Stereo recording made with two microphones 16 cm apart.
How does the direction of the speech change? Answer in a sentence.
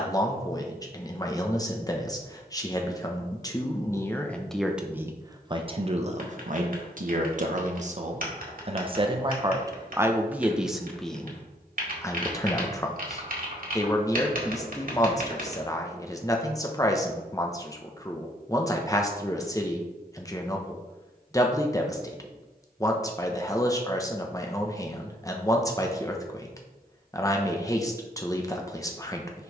You can hear the speech go right and come back.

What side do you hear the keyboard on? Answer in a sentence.
You can hear the keyboard on the right.